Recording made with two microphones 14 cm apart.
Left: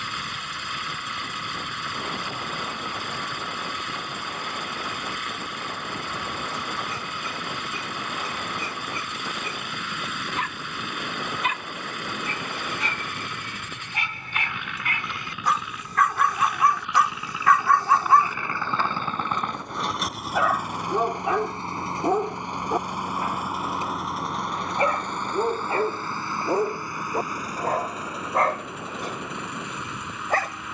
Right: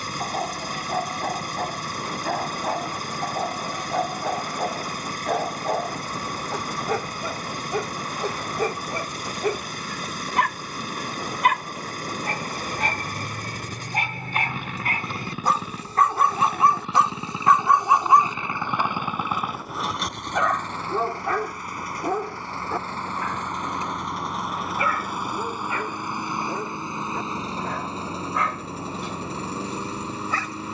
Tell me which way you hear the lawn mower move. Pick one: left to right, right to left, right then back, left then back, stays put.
left then back.